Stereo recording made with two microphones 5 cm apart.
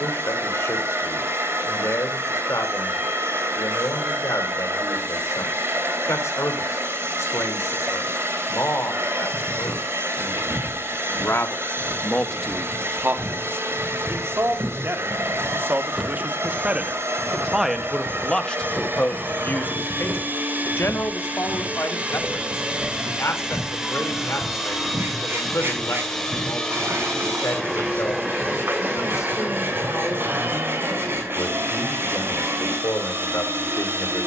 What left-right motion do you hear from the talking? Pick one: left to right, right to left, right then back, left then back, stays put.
right then back.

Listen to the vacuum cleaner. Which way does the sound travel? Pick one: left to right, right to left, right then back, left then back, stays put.
left then back.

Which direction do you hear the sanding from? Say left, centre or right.
right.